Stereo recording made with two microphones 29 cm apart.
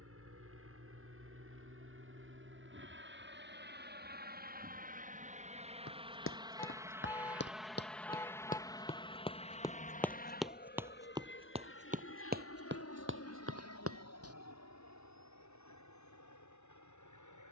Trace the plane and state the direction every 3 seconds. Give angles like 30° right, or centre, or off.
50° right, 30° right, centre, 30° left, 50° left, 60° left.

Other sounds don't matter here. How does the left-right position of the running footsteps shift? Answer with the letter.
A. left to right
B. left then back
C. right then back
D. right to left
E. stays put
A.